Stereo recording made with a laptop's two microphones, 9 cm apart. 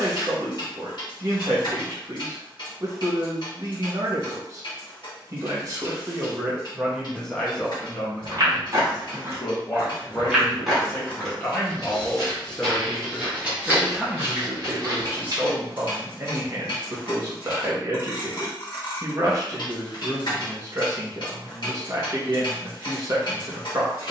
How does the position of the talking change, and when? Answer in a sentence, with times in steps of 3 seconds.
In this clip you hear the talking on the right from 0 s, in the centre from 6 s, on the left from 9 s, in the centre from 12 s and on the right from 15 s.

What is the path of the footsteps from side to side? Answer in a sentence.
You can hear the footsteps go left and come back.